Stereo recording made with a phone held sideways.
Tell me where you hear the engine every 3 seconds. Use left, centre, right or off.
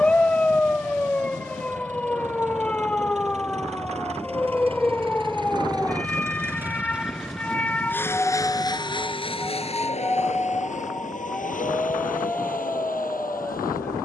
right, right, centre, left, left.